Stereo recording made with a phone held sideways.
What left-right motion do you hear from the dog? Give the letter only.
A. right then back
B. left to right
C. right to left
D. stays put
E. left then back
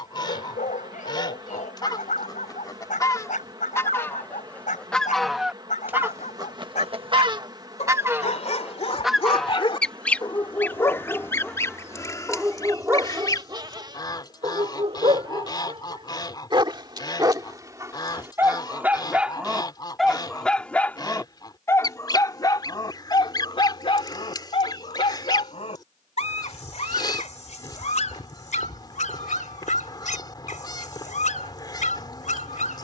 A.